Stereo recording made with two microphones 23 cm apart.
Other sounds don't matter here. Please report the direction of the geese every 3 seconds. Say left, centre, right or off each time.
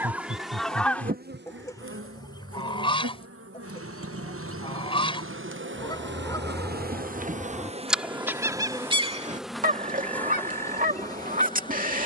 centre, left, centre, right.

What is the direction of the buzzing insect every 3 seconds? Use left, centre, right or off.
right, right, right, centre.